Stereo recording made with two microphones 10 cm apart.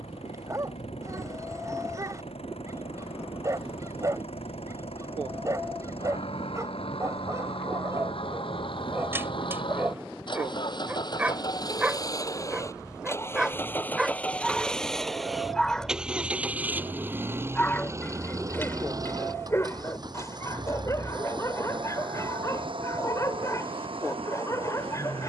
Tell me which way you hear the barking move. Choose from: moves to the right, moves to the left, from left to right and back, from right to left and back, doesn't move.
moves to the left.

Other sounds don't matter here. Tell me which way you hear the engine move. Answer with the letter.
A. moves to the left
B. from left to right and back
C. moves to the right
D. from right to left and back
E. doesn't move
C.